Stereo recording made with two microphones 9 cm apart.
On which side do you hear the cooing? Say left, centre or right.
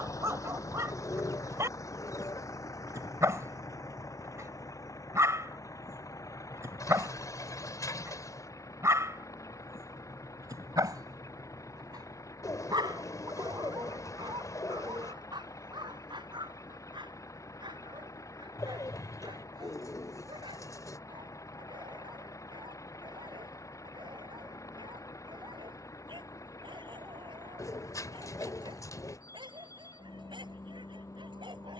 left.